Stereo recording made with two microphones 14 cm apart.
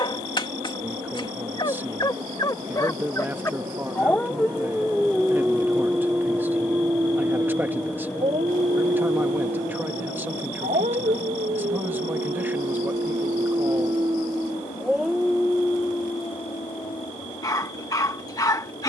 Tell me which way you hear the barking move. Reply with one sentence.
You can hear the barking move from left to right and back again.